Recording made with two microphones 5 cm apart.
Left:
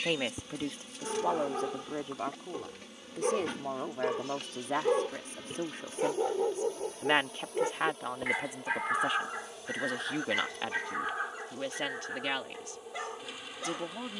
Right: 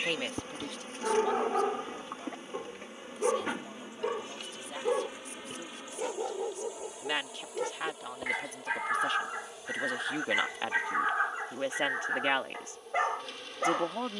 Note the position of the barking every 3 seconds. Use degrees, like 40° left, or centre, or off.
30° right, centre, 10° left, 20° right, 40° right.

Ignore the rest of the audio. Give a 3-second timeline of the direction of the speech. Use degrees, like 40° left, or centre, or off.
40° left, 50° left, 20° left, 10° right, 30° right.